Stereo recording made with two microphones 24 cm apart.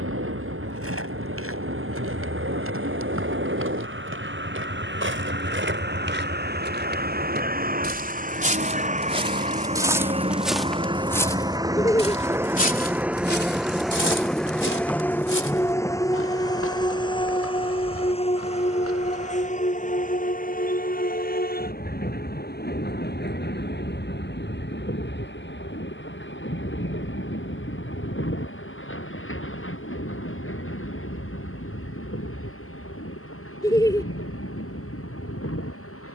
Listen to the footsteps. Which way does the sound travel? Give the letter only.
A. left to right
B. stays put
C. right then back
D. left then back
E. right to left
E.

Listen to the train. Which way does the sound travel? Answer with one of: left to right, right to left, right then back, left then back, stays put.
right to left.